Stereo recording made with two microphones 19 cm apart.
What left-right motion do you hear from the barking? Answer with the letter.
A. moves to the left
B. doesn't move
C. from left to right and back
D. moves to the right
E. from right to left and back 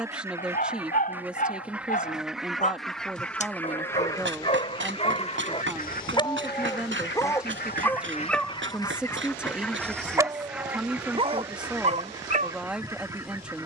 D.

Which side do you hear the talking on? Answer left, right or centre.
centre.